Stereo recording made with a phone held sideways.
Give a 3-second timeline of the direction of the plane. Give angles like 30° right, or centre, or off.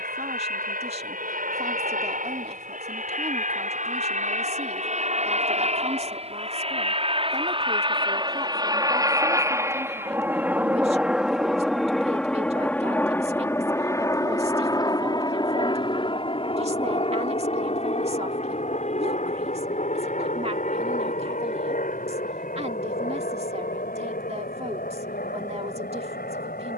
60° right, 50° right, 30° right, 10° right, 10° left, 30° left, 40° left, 50° left, 60° left.